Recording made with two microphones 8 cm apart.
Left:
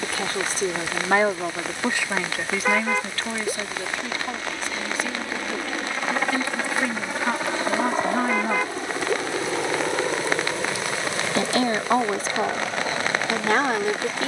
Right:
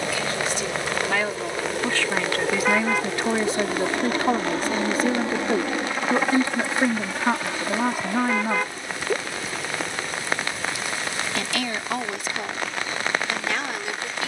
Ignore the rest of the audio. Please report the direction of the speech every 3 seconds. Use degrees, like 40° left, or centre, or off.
20° left, 40° right, 20° right, 30° left, 40° left.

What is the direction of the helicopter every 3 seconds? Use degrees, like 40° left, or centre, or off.
70° right, 40° right, 20° left, 50° left, 60° left.